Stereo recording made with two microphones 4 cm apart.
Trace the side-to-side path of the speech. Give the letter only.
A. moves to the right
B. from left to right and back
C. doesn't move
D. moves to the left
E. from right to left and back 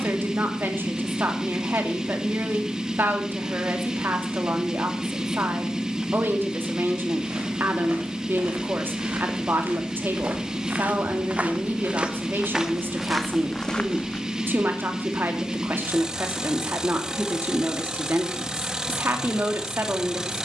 C.